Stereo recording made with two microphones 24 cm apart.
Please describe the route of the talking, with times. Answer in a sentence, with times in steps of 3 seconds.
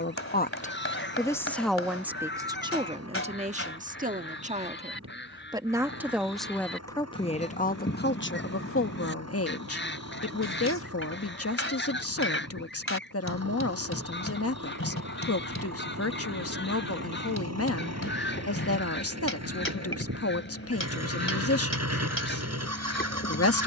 You can hear the talking in the centre from 0 s, on the right from 3 s and on the left from 6 s.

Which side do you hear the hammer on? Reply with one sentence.
You can hear the hammer on the left.